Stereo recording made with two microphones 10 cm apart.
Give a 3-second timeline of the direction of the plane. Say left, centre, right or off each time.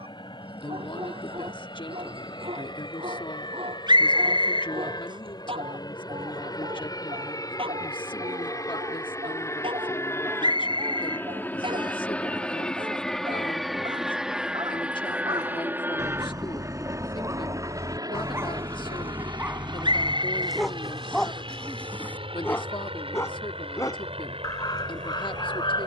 left, left, left, left, centre, right, right, right, right.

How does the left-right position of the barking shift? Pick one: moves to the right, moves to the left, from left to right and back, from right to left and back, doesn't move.
moves to the left.